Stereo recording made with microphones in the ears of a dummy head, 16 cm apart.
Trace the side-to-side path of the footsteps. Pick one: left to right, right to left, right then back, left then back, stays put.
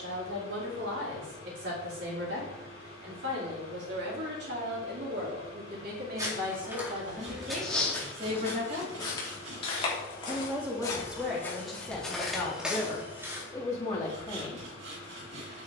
left then back.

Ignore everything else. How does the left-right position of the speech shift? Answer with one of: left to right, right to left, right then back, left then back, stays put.
right to left.